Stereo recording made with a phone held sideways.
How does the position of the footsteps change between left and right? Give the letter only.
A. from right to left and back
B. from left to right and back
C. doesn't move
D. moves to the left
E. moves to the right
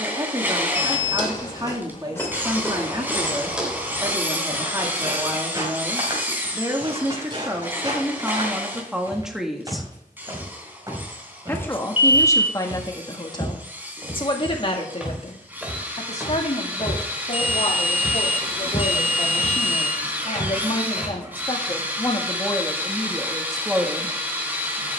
B.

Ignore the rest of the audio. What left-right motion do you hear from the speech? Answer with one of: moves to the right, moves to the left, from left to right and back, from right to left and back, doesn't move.
from right to left and back.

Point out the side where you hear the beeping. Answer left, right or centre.
left.